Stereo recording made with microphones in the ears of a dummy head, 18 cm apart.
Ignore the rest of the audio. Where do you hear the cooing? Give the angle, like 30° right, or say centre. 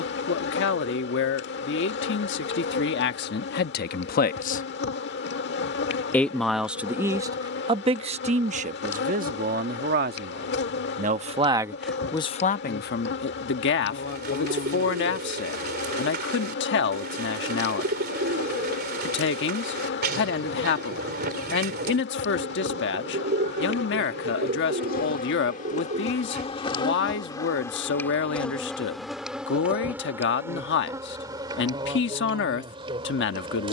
50° right.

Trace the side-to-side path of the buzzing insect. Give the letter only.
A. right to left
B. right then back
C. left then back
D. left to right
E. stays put
D.